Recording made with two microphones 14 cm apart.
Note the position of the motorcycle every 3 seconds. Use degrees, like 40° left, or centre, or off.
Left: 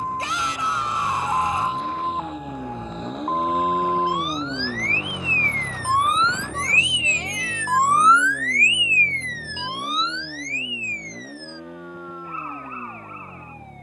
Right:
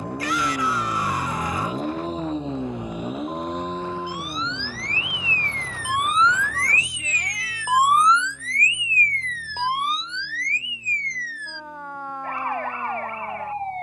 50° right, 30° left, 60° left, 70° left, 70° left.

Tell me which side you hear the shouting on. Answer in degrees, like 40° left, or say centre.
20° left.